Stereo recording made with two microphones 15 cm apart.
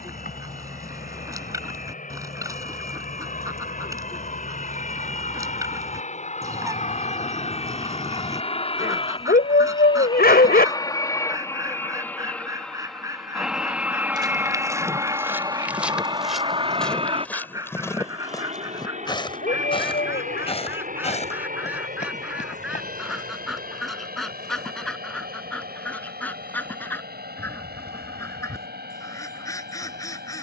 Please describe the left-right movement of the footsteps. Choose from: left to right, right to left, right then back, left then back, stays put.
right to left.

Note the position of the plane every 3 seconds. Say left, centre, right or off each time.
left, left, left, left, centre, right, right, right, right, right.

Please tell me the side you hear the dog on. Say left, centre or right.
left.